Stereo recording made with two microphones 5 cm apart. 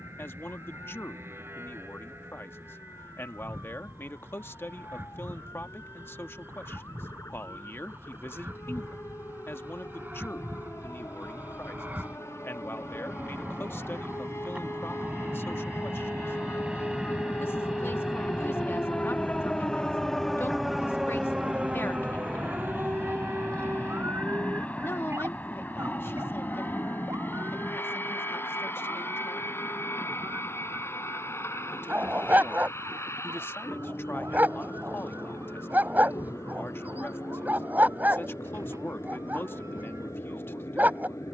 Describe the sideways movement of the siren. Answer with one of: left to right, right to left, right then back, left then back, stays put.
left to right.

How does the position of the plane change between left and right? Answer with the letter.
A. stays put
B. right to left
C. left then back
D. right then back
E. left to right
B.